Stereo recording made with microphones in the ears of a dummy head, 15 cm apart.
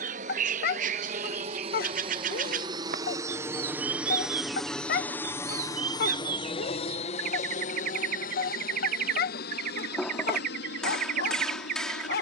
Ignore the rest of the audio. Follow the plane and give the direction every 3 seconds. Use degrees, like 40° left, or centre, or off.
40° right, centre, 40° left, 60° left.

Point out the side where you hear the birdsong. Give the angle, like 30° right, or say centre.
50° right.